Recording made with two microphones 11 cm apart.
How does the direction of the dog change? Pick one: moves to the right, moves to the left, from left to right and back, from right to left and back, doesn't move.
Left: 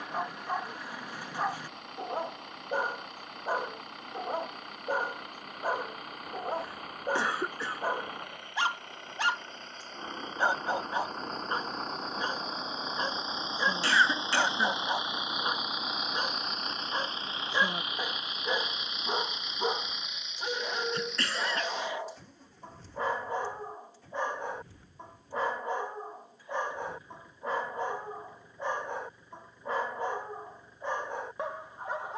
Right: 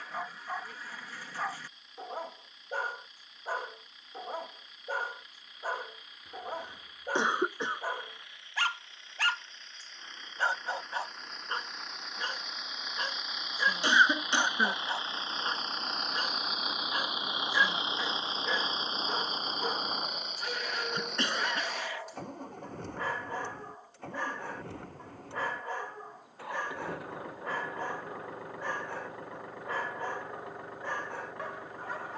doesn't move.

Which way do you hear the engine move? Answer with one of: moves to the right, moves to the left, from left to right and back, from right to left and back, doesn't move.
moves to the right.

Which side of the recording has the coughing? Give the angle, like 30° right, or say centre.
20° right.